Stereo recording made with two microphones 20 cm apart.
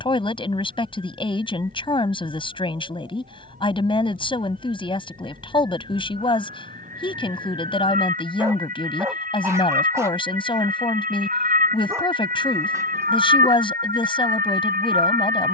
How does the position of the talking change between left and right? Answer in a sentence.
You can hear the talking stay in one place.